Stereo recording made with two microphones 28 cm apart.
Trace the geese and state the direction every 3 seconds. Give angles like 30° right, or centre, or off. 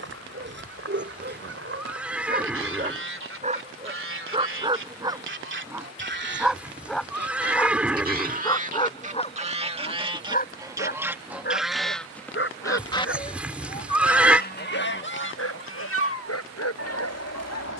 50° right, 50° right, 30° right, 10° right, 20° left, 60° left.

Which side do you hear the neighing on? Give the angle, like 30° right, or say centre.
centre.